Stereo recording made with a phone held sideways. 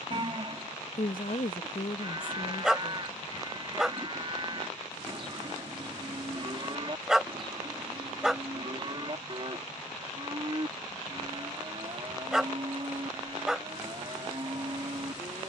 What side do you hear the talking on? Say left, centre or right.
left.